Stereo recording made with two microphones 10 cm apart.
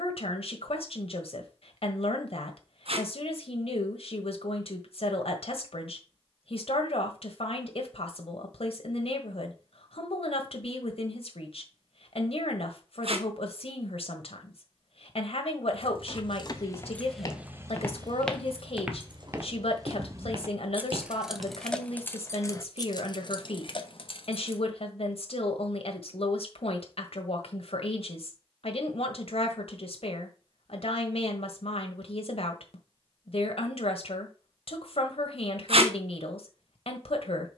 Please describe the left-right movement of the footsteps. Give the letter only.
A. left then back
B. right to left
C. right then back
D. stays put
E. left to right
E.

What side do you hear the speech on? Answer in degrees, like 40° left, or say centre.
70° left.